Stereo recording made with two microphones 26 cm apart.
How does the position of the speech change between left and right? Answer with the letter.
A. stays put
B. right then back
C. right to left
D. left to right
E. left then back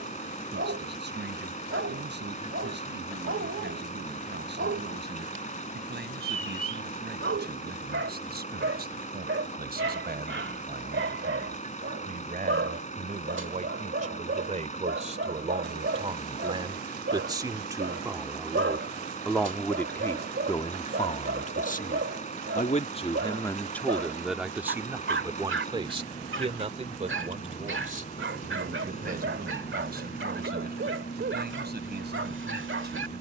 E.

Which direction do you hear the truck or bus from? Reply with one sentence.
In this clip you hear the truck or bus on the left.